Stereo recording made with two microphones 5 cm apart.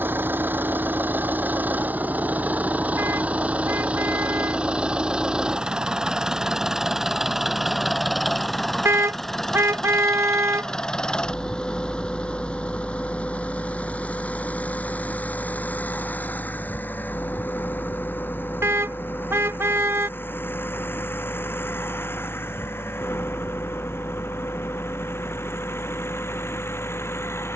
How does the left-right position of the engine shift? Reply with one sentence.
You can hear the engine travel towards the left.